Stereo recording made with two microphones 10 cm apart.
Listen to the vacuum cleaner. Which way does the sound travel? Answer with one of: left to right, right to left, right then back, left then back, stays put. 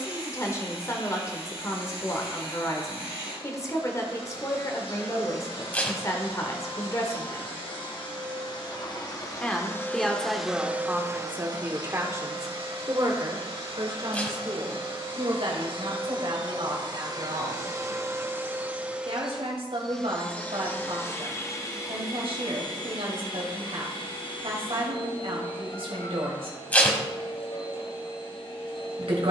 right then back.